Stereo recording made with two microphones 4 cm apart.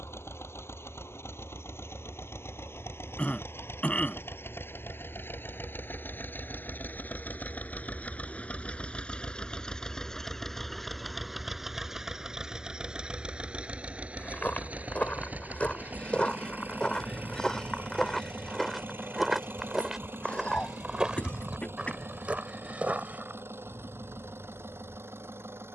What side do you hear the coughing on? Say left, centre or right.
left.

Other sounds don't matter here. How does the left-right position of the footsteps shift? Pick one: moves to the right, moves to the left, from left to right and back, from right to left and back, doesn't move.
moves to the right.